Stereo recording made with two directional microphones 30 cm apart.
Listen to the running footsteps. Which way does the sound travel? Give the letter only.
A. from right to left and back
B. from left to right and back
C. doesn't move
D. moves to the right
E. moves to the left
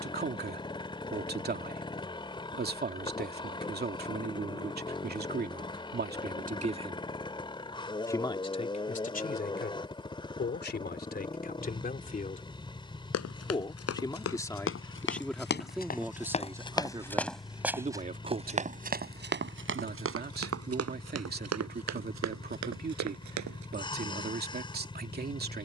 D.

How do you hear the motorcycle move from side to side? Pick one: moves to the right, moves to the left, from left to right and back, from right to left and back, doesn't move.
doesn't move.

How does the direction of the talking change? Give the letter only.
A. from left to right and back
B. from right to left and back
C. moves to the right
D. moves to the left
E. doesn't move
B.